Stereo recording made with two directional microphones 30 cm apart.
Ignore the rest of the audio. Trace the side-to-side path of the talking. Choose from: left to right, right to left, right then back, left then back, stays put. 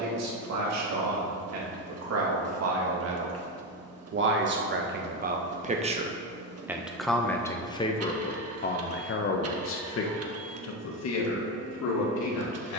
right to left.